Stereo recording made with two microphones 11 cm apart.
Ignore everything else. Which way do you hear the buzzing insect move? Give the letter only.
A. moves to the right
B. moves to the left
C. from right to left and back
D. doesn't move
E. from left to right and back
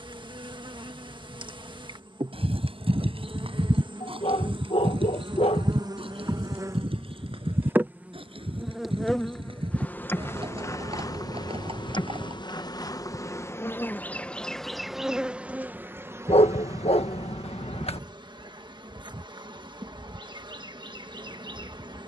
C.